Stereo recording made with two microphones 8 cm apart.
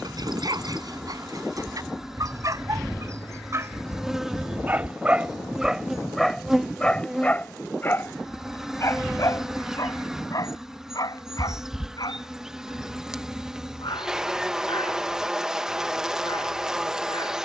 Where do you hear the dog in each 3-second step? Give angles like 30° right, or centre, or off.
50° right, 30° right, 20° left, 50° left, 70° left, 80° left.